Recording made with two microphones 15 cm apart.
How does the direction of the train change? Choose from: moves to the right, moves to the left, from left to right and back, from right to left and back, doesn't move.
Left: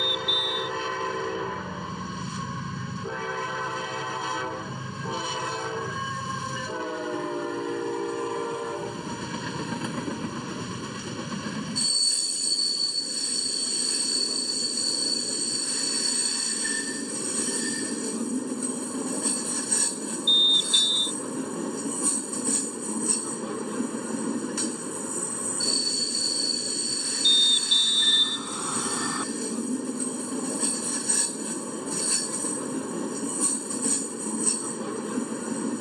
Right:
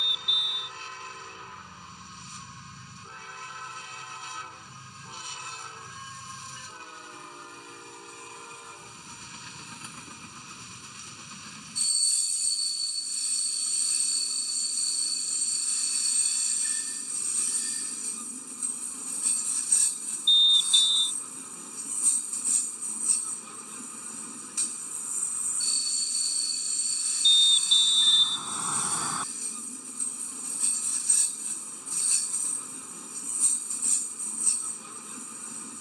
doesn't move.